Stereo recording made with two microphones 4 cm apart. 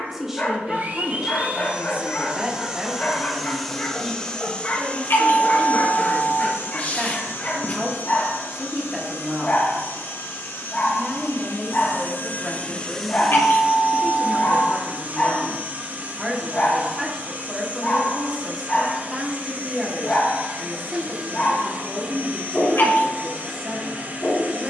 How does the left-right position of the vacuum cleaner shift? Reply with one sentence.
In this clip you hear the vacuum cleaner go left and come back.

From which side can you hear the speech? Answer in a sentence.
In this clip you hear the speech in the centre.